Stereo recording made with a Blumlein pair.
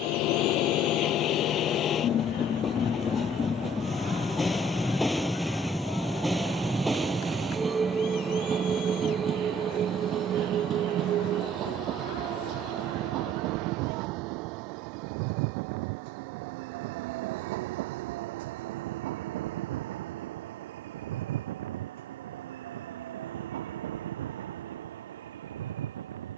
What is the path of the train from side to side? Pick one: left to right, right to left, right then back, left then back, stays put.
left to right.